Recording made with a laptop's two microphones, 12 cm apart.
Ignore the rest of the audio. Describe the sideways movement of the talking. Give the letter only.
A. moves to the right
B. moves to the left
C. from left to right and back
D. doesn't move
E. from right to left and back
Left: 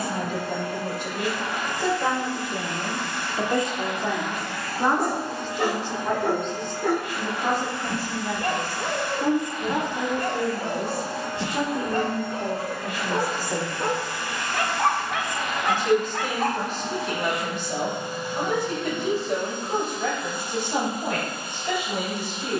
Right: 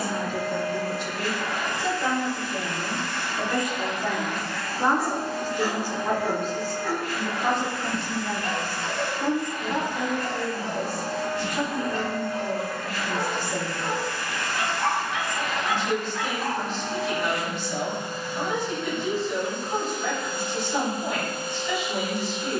C.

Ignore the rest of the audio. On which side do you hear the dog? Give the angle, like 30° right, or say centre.
60° left.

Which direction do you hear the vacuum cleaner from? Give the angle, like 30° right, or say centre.
20° left.